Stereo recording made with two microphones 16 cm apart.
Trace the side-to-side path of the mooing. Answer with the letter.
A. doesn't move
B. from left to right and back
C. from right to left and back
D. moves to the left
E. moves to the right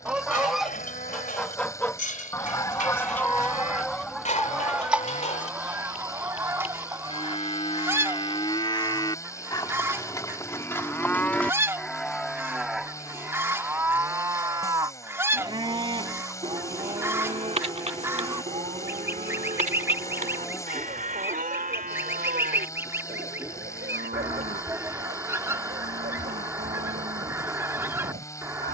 E.